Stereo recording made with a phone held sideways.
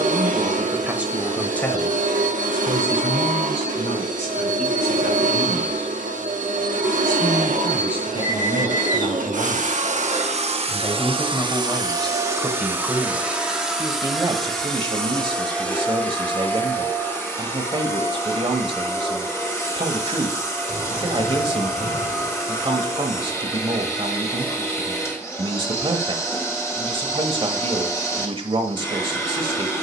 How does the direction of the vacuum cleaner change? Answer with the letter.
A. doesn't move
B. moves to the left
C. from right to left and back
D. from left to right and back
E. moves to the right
B.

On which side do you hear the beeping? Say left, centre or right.
left.